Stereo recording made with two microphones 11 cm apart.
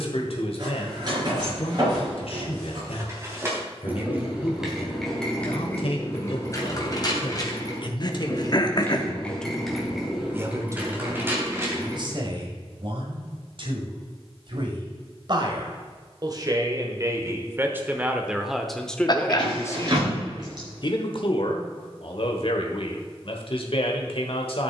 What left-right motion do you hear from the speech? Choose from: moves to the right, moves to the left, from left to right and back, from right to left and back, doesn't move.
from left to right and back.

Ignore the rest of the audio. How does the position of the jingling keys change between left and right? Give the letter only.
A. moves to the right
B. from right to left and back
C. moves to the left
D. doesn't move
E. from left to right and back
B.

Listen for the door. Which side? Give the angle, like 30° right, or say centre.
40° right.